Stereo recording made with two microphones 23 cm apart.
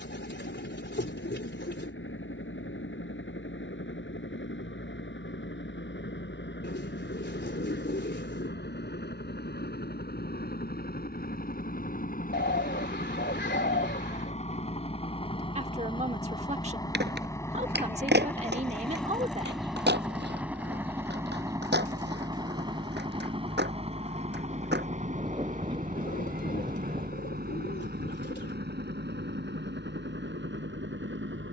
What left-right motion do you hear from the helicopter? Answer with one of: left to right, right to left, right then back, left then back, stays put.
left to right.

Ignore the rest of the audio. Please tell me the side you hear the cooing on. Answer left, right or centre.
left.